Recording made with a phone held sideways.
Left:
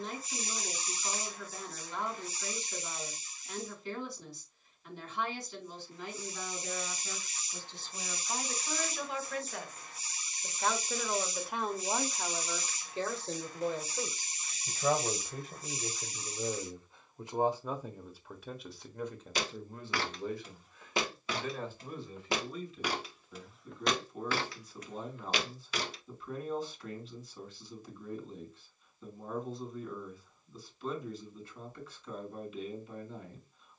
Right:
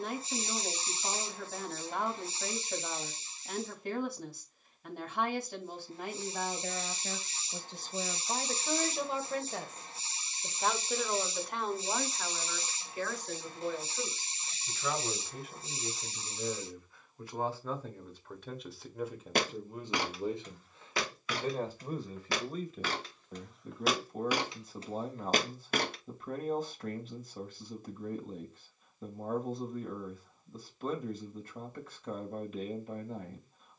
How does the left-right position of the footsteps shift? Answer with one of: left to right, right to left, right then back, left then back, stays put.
left then back.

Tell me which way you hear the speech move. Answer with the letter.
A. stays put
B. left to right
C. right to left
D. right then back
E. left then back
E.